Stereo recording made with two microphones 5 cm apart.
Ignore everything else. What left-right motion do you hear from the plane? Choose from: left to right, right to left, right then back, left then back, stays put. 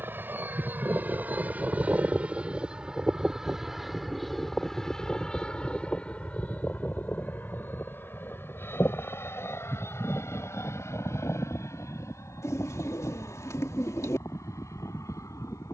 right to left.